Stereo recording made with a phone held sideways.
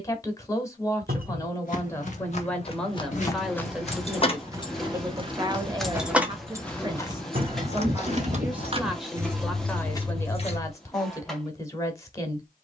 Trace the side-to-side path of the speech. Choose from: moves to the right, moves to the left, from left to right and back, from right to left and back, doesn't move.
from left to right and back.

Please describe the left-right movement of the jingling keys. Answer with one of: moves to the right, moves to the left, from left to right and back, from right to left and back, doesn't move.
from left to right and back.